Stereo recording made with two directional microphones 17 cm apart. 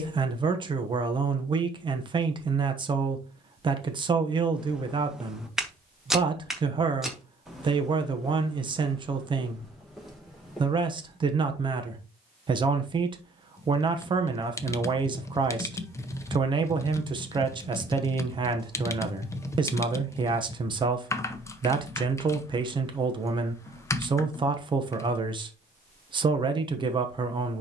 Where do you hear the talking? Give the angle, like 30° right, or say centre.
30° right.